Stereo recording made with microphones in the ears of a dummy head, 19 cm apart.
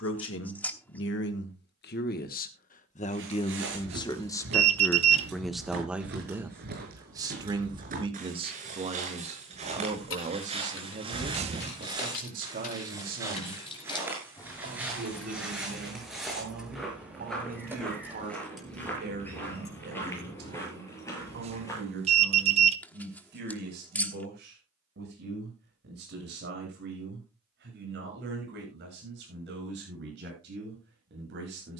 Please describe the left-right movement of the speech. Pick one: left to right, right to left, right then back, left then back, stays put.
left to right.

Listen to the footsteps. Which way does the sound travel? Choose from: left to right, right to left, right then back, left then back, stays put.
right to left.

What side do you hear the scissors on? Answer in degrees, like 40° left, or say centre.
10° left.